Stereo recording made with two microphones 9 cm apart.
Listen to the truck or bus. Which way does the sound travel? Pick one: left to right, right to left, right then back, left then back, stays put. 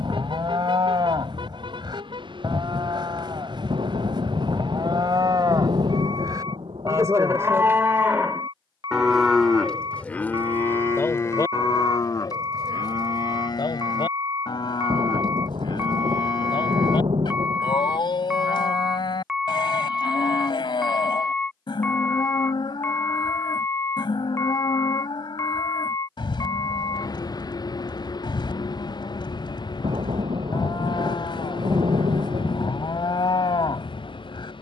right to left.